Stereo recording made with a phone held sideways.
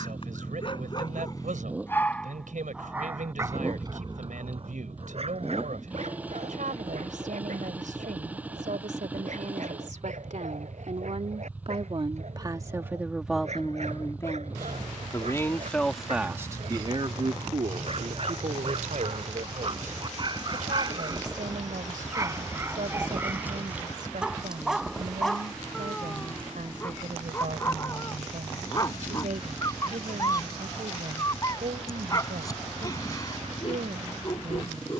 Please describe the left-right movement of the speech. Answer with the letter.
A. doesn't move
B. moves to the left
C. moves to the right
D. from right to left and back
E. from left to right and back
D.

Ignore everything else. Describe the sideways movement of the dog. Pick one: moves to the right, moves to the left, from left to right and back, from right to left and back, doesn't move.
from left to right and back.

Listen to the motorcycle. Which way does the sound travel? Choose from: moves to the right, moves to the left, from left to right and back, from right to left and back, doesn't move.
doesn't move.